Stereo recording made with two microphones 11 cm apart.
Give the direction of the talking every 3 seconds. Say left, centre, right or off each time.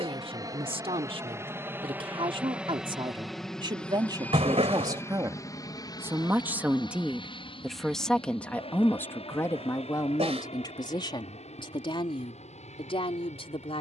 right, right, centre, left, left.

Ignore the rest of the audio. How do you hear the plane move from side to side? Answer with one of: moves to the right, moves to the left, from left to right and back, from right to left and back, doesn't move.
moves to the left.